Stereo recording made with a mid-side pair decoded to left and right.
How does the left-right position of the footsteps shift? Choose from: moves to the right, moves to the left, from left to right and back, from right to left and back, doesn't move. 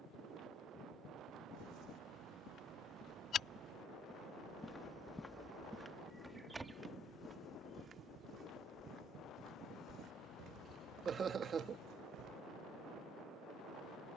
moves to the right.